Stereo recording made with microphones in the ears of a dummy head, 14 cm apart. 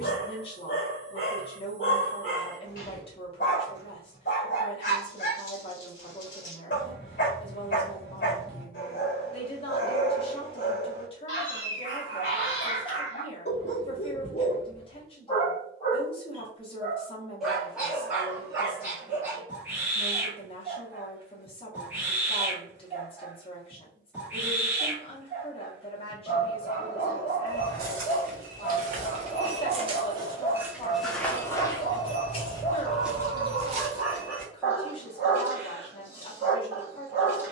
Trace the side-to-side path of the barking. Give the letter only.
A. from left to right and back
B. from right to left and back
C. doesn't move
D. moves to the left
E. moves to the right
E.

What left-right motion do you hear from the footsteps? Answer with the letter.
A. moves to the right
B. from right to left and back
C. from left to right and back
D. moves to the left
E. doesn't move
B.